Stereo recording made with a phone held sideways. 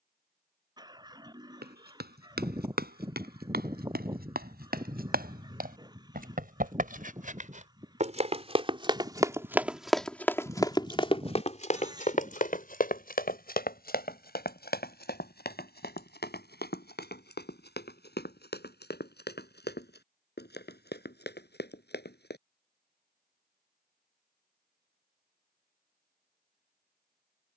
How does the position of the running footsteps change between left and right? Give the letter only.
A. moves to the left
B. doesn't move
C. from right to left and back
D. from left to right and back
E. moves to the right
A.